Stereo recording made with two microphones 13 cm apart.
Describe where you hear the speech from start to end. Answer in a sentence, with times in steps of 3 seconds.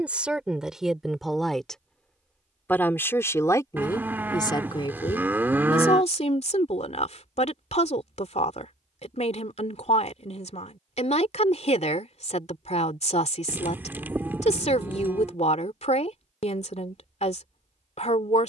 You can hear the speech in the centre from 0 s and on the left from 3 s.